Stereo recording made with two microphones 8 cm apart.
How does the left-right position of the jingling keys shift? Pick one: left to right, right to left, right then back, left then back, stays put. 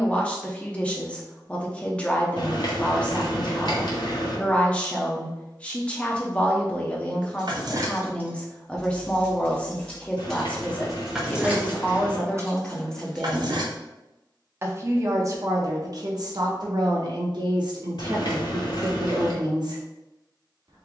left then back.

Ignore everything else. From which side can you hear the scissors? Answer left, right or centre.
left.